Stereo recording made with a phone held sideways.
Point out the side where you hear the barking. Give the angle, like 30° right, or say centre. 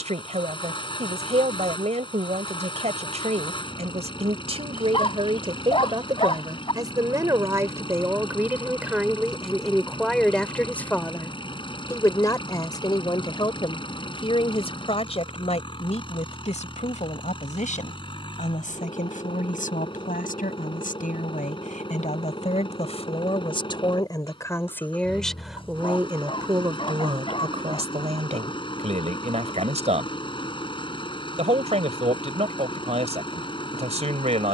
30° left.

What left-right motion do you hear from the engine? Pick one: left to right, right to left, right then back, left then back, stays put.
stays put.